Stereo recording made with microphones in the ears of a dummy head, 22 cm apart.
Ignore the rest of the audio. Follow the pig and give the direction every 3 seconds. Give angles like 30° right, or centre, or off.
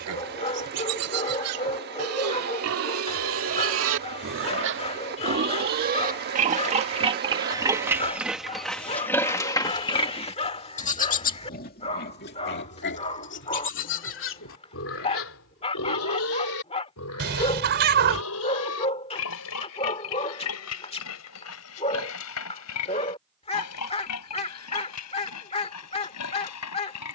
70° right, 50° right, 20° right, 30° left, 50° left, 60° left, 70° left, 70° left, 70° left.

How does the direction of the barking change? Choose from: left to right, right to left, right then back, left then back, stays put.
stays put.